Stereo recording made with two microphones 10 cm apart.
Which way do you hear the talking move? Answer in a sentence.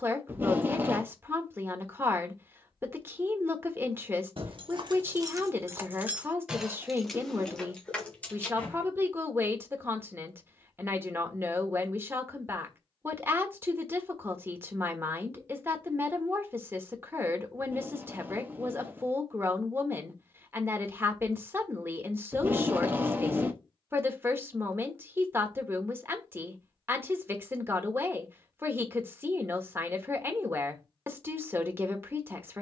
You can hear the talking stay put.